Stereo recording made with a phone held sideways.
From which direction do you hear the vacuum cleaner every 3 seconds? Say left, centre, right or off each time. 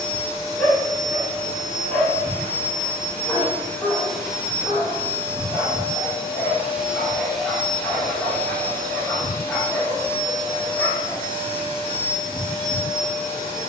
left, centre, centre, left, left.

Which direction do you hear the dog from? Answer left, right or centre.
centre.